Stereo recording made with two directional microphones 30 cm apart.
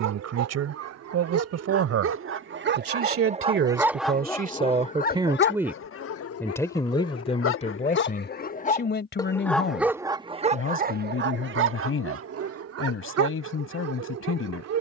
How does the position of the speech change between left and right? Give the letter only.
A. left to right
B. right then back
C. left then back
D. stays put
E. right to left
E.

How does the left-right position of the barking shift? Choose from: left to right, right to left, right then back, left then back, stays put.
left then back.